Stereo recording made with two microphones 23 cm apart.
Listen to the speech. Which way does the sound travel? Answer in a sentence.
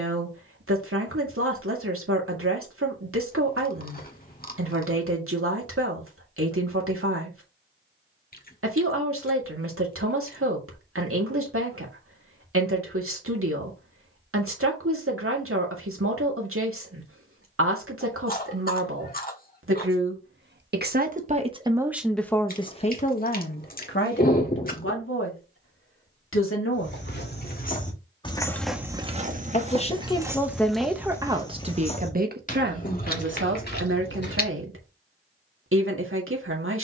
In this clip you hear the speech move from right to left and back again.